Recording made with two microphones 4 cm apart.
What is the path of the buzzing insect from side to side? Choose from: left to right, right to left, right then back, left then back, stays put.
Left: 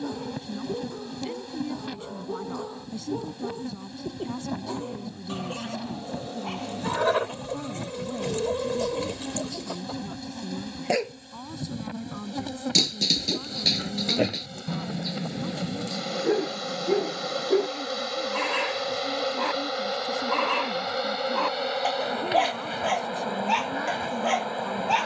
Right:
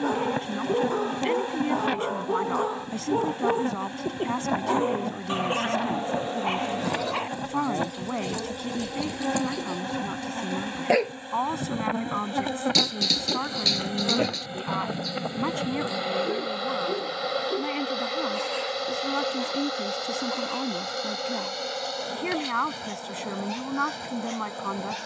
right to left.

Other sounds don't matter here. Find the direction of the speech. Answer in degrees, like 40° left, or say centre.
60° right.